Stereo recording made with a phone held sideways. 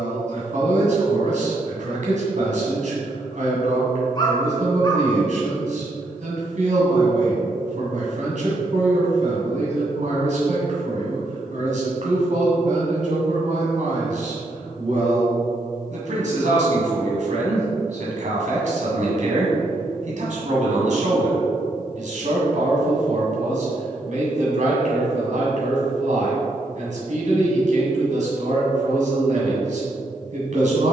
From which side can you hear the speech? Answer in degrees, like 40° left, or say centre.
60° right.